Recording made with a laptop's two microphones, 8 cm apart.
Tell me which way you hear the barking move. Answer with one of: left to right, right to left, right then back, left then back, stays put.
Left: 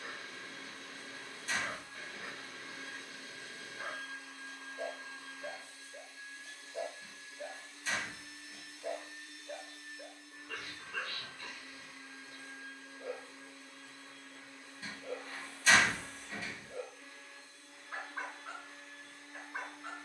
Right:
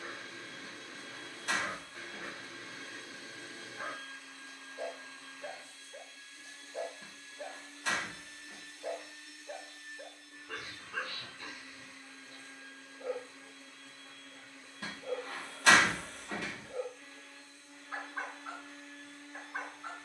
stays put.